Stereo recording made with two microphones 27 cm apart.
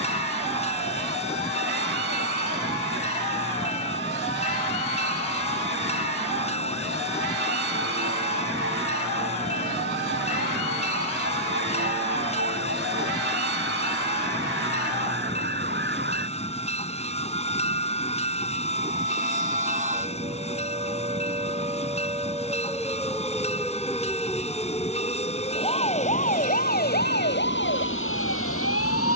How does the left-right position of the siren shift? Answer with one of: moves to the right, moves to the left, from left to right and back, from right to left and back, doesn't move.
moves to the left.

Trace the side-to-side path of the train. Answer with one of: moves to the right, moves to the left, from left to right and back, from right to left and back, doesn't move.
doesn't move.